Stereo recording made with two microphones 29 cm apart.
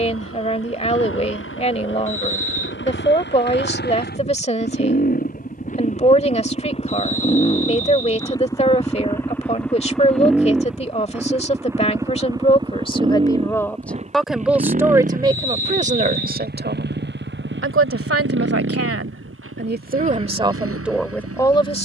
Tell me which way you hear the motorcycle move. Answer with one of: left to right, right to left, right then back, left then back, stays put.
left to right.